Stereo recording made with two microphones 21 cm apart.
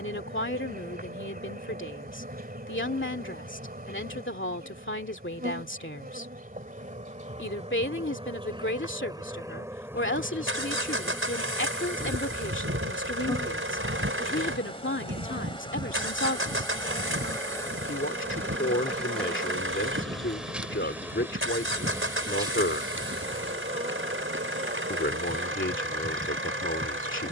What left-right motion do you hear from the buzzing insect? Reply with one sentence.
In this clip you hear the buzzing insect go left and come back.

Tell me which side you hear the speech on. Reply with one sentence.
In this clip you hear the speech on the left.